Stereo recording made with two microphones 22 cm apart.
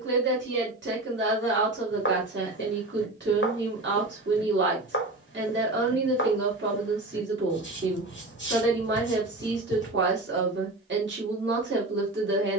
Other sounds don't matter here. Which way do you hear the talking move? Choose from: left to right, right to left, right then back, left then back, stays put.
stays put.